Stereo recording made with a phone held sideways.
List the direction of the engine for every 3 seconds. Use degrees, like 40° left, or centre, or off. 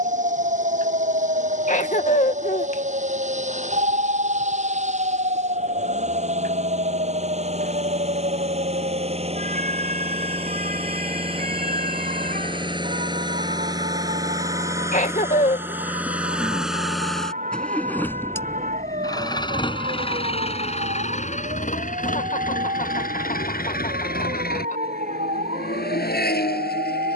50° right, 50° right, 40° right, 40° right, 30° right, 10° right, 30° left, 60° left, 80° left.